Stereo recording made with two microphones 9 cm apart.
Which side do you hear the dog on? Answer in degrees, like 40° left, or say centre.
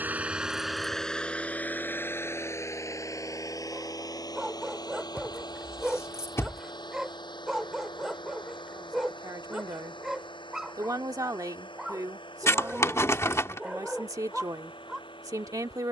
10° right.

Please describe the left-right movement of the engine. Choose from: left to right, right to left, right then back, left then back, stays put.
right to left.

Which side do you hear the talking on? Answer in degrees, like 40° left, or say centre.
40° right.